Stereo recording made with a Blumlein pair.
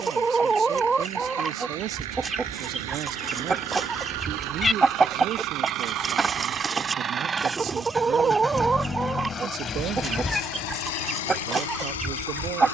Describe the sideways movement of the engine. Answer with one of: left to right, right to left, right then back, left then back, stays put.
right to left.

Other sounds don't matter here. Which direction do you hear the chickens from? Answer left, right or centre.
centre.